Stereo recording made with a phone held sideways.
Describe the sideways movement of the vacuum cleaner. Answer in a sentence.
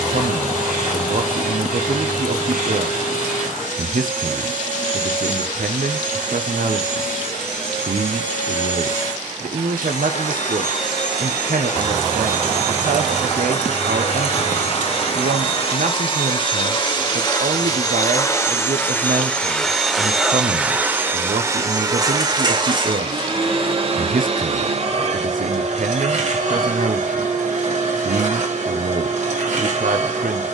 You can hear the vacuum cleaner travel towards the right.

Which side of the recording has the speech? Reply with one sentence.
In this clip you hear the speech on the right.